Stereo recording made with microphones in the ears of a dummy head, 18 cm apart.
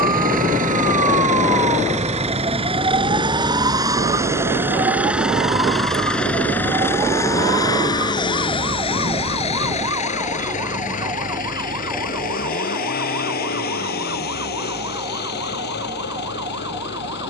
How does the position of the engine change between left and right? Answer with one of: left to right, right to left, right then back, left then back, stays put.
right to left.